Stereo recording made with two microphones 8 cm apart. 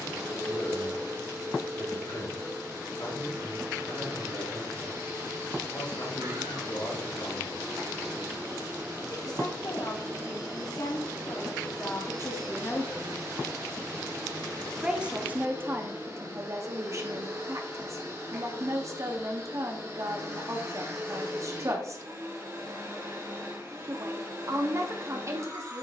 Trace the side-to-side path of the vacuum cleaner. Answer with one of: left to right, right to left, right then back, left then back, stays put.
stays put.